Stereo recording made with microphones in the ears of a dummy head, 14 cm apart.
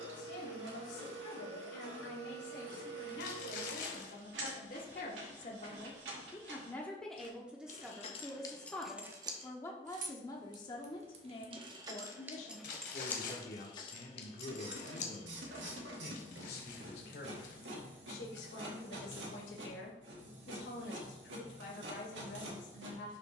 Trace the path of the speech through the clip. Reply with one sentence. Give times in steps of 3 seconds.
You can hear the speech on the left from 0 s, in the centre from 6 s and on the left from 9 s.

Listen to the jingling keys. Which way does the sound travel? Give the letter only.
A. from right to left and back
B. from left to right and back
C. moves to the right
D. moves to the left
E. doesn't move
B.